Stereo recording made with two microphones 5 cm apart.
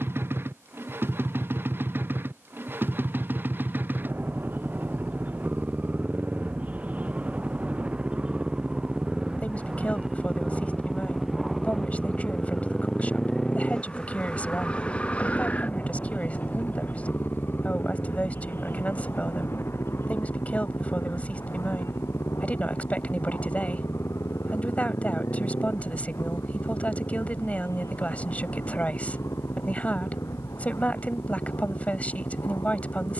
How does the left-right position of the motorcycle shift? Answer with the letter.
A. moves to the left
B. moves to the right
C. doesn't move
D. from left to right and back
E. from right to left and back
A.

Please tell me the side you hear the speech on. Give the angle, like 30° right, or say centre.
30° left.